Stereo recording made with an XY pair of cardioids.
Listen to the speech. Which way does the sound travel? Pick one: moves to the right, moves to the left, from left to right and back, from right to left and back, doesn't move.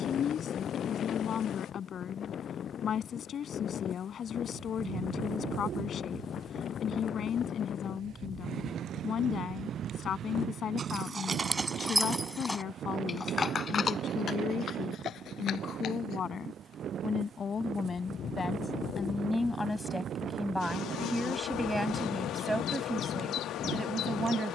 moves to the right.